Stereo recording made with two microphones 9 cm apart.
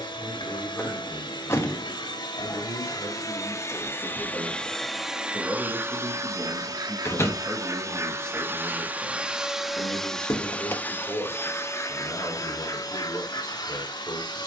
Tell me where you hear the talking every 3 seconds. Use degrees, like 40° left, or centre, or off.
30° left, 10° left, 10° right, 20° left, 30° left.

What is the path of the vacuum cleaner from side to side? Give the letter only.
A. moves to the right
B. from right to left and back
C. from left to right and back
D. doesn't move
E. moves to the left
C.